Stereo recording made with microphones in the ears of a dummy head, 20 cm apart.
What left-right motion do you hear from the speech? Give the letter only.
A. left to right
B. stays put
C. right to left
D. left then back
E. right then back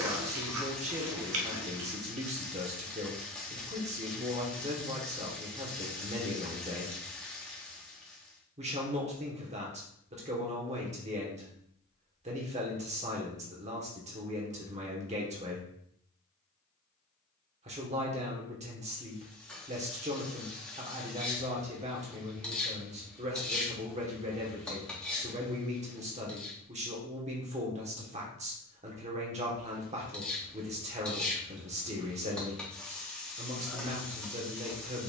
B.